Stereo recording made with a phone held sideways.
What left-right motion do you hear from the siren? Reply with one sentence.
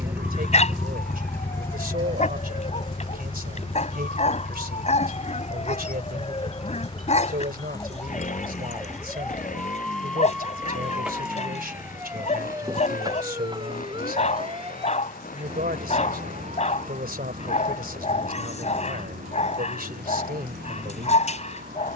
In this clip you hear the siren travel towards the right.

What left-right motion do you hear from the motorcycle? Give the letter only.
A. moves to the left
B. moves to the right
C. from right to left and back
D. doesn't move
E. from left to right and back
A.